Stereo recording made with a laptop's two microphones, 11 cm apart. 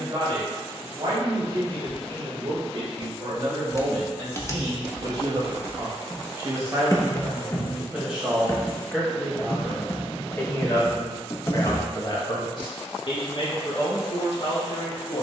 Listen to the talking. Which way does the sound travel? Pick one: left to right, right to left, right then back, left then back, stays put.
right to left.